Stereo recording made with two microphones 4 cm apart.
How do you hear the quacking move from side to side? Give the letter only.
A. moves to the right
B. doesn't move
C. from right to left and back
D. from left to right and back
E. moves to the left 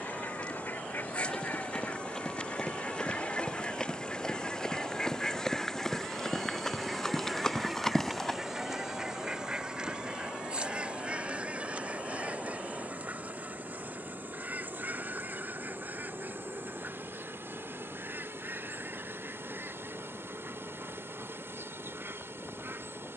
A.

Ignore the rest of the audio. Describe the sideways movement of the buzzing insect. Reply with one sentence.
In this clip you hear the buzzing insect move to the right.